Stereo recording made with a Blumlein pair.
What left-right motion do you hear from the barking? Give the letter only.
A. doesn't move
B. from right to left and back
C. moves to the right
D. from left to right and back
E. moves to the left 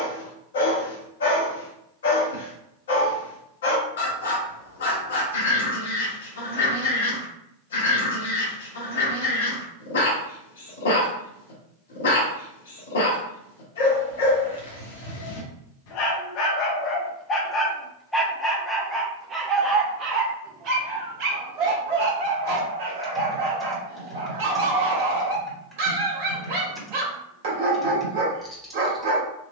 C.